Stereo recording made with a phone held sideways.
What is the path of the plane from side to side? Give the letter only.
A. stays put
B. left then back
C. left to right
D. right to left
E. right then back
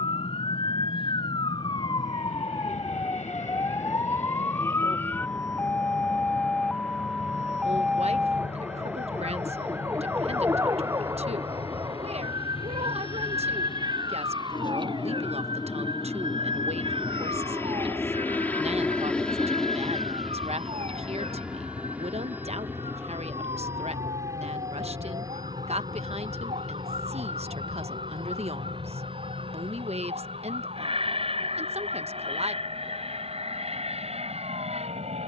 C.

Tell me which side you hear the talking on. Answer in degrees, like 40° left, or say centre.
50° right.